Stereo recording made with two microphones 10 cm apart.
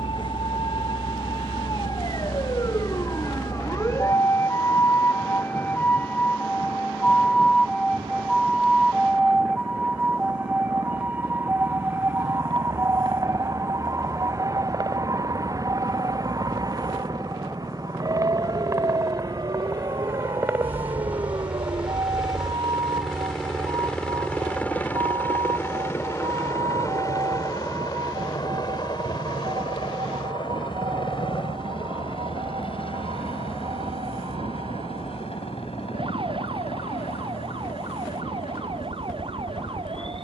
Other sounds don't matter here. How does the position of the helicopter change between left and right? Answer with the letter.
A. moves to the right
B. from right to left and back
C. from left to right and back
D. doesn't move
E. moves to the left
E.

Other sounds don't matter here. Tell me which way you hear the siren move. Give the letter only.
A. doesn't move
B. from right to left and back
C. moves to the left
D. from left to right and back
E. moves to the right
E.